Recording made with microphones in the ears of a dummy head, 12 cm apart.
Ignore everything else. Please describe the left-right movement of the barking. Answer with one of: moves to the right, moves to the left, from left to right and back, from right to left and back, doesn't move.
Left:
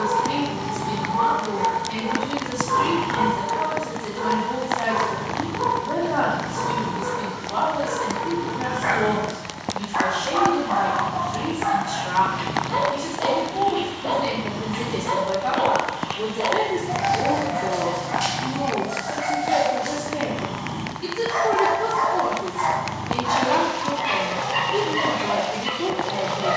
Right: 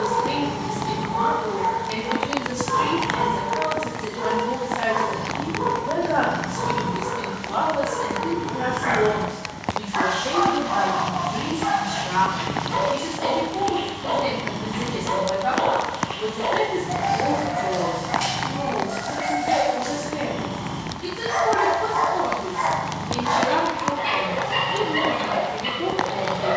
moves to the right.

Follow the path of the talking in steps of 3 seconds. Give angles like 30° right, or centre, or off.
60° right, 60° right, 60° right, 30° right, centre, 10° left, 10° left, 10° left, 10° left.